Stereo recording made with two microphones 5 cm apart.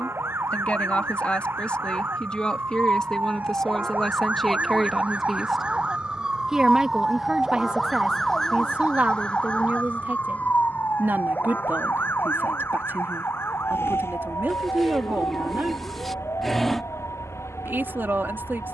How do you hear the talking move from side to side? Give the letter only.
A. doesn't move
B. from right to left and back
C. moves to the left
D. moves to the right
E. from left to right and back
D.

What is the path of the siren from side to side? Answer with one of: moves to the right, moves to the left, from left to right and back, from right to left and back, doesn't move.
moves to the left.